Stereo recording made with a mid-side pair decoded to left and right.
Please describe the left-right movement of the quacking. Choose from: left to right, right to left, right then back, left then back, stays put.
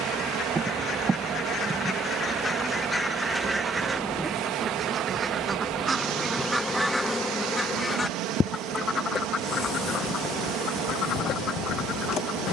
right then back.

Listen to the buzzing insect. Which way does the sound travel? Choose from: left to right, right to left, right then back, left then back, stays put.
right to left.